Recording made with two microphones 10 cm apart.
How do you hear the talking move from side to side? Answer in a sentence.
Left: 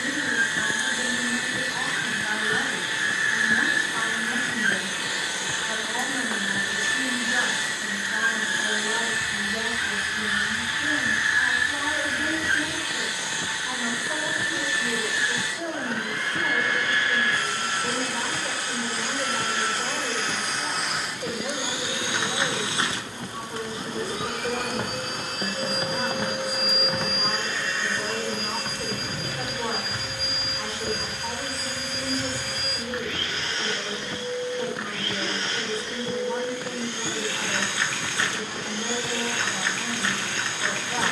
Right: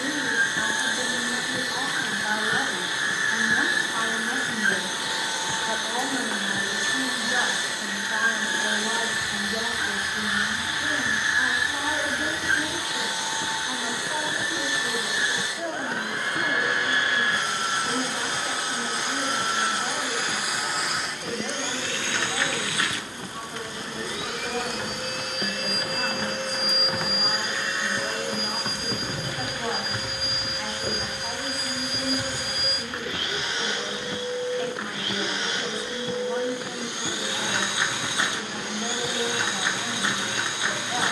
In this clip you hear the talking move from right to left.